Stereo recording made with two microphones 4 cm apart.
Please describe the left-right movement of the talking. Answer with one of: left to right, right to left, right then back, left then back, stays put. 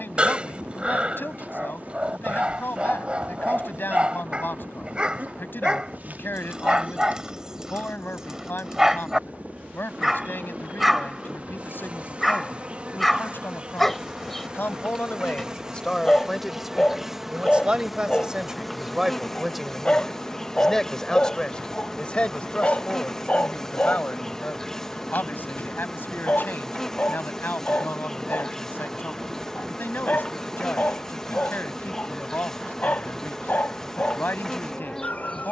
right then back.